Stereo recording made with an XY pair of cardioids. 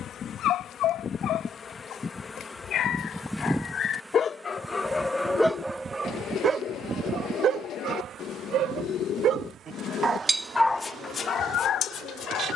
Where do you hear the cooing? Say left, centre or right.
left.